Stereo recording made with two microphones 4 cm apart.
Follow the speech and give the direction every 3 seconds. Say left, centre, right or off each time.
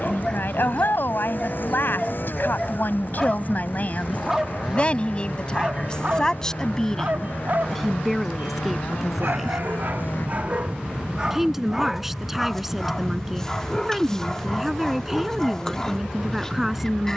left, left, centre, centre, centre, centre.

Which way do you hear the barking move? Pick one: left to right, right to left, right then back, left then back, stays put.
right then back.